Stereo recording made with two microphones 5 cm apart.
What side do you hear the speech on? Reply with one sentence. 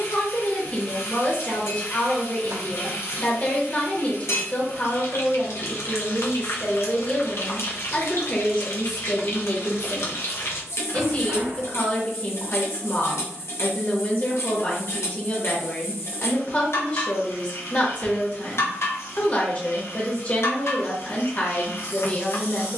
In this clip you hear the speech on the left.